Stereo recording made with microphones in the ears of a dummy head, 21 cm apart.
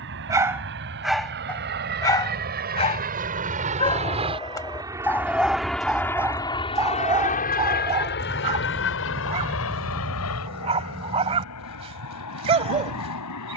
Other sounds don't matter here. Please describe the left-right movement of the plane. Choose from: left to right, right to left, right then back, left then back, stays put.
right to left.